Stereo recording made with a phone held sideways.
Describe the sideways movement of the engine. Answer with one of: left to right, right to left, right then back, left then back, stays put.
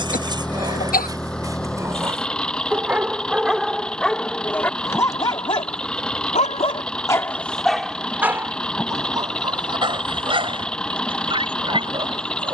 stays put.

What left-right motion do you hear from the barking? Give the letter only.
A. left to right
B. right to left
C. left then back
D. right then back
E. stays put
C.